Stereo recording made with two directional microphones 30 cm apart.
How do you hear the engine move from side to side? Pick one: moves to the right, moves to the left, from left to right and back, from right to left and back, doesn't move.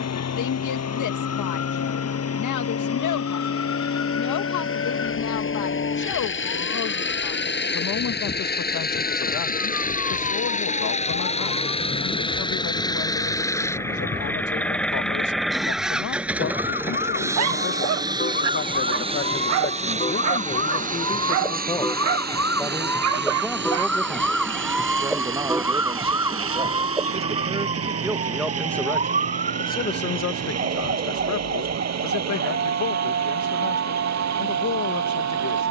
moves to the right.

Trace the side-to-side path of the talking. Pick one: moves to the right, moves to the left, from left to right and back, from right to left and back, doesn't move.
from left to right and back.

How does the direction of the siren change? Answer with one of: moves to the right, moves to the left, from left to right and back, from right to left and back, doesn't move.
moves to the right.